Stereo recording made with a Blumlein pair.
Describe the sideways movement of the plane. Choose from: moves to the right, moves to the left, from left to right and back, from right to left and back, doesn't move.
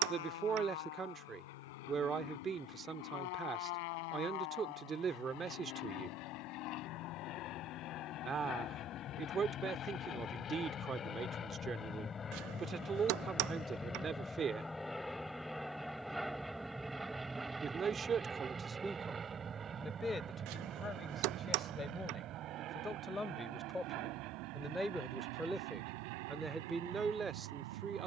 moves to the right.